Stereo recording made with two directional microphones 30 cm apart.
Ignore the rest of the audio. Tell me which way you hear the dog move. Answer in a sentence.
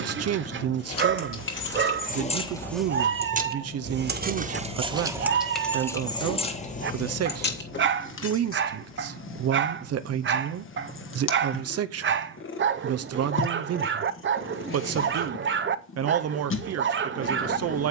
You can hear the dog stay in one place.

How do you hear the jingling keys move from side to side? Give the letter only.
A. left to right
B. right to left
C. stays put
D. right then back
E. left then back
D.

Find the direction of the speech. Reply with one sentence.
In this clip you hear the speech on the right.